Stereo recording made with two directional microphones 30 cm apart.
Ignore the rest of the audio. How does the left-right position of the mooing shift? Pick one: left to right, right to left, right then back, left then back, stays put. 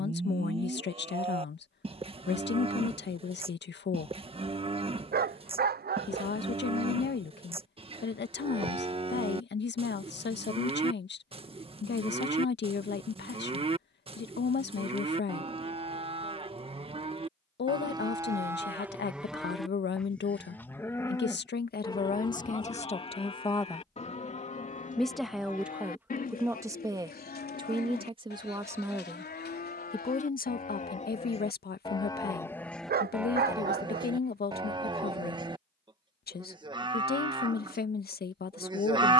left then back.